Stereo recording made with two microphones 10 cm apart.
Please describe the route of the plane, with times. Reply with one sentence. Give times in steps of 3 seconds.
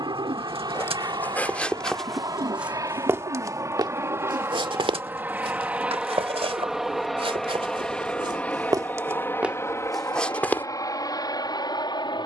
In this clip you hear the plane on the right from 0 s, in the centre from 6 s and on the left from 9 s.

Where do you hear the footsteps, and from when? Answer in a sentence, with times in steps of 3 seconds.
You can hear the footsteps in the centre from 0 s, on the right from 3 s and in the centre from 9 s.